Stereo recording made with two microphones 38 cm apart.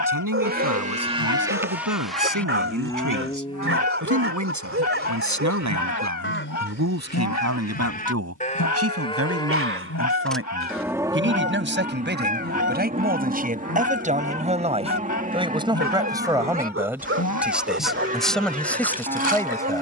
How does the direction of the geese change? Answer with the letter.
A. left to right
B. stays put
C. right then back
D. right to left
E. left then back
B.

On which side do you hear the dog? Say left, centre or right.
right.